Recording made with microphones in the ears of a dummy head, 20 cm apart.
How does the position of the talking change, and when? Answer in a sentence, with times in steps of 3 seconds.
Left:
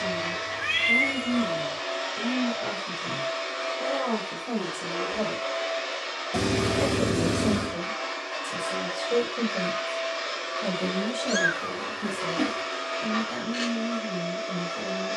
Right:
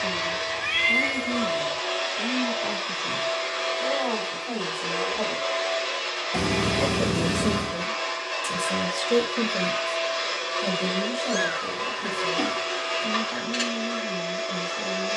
In this clip you hear the talking on the left from 0 s, on the right from 6 s, in the centre from 9 s and on the left from 12 s.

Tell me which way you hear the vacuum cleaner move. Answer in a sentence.
In this clip you hear the vacuum cleaner stay in one place.